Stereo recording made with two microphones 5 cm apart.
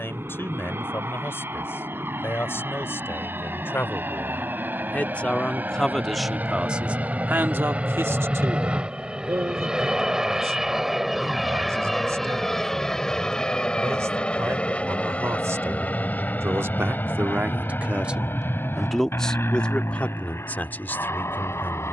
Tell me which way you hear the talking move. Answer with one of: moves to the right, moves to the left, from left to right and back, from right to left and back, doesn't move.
from left to right and back.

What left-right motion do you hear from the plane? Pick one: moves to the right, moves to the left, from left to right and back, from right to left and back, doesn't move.
moves to the left.